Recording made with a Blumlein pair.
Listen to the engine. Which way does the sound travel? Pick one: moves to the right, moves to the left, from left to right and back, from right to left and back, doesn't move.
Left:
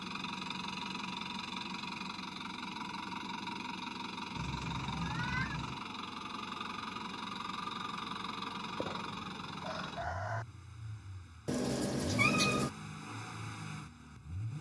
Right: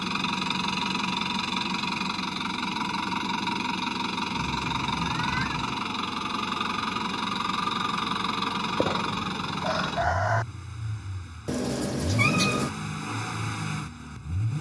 doesn't move.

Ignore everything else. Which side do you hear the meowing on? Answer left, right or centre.
right.